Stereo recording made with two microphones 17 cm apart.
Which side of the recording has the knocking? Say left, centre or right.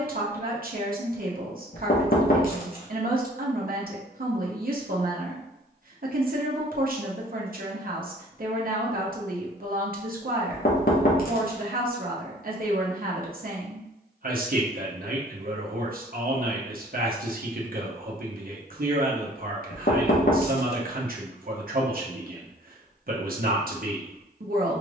left.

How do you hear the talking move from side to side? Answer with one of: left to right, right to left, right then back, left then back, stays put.
stays put.